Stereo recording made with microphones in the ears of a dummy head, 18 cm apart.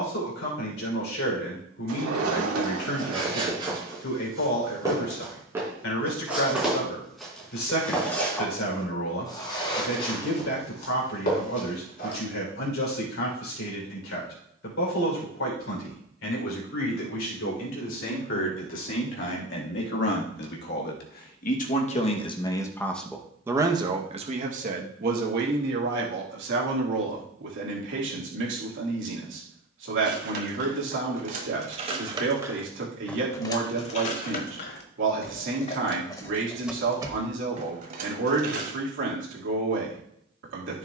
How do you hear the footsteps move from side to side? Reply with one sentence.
You can hear the footsteps move to the left.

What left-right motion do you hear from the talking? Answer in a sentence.
You can hear the talking travel towards the right.